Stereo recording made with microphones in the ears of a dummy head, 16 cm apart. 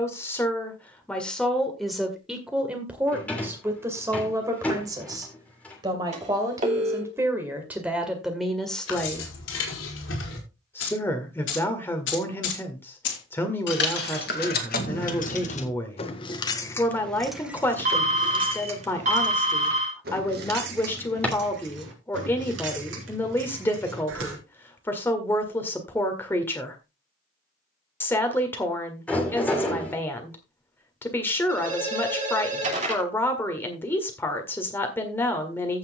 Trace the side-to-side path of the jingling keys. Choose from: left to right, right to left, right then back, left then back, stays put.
left to right.